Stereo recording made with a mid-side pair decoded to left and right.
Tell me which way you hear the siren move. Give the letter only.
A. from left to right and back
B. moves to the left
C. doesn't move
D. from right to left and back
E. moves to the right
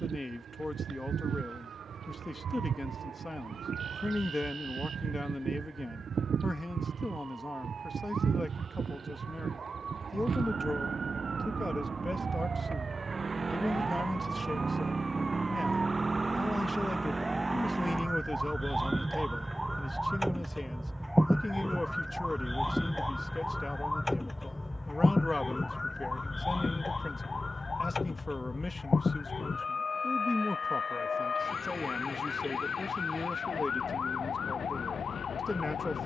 B.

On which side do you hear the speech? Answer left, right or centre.
left.